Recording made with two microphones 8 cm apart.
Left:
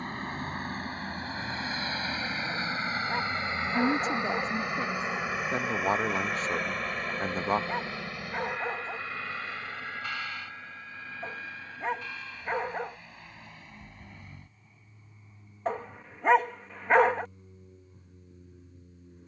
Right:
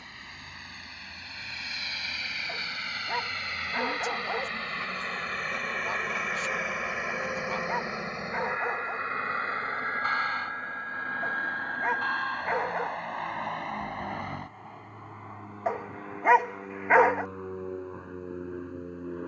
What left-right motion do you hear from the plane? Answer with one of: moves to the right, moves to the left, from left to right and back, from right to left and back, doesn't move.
moves to the right.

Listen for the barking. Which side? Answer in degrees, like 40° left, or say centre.
10° right.